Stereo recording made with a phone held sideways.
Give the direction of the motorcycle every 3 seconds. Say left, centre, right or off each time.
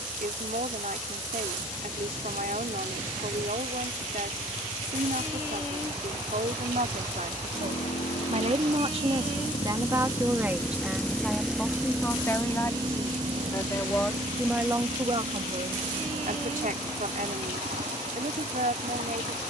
left, left, left, left, right, right, right.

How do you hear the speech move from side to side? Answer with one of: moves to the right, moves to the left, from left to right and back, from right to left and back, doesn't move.
from right to left and back.